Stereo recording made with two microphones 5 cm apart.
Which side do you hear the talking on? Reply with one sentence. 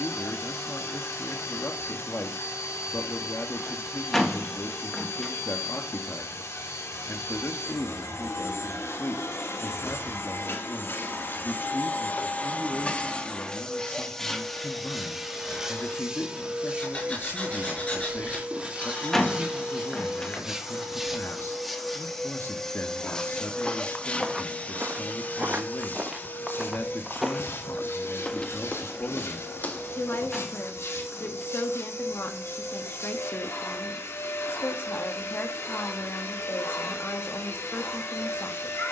You can hear the talking on the left.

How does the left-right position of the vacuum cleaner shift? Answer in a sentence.
You can hear the vacuum cleaner go right and come back.